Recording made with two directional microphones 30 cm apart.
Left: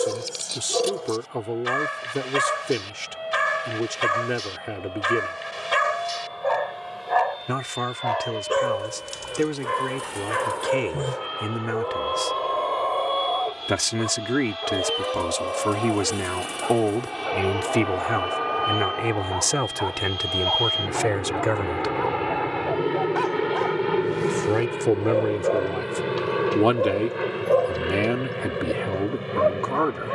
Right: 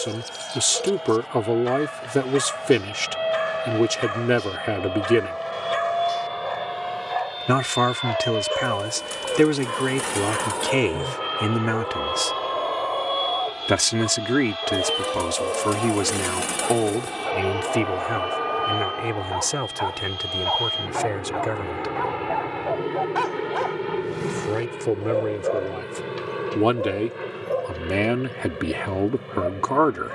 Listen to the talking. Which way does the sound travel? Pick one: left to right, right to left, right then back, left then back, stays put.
left then back.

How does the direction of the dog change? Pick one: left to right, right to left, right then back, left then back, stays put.
right then back.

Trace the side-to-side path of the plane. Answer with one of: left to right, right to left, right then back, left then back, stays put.
right to left.